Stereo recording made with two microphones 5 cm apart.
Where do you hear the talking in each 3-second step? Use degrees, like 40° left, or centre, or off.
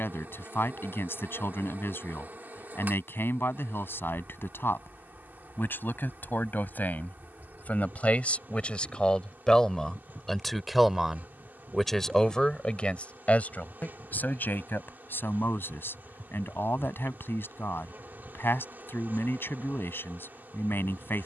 50° left, 50° left, 30° left, centre, 30° left, 50° left, 50° left.